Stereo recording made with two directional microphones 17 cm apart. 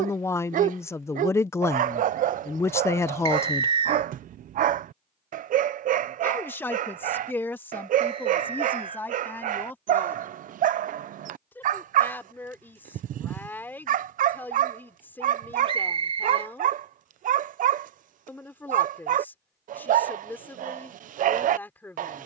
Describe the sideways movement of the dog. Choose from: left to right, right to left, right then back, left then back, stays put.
stays put.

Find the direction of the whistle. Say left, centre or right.
right.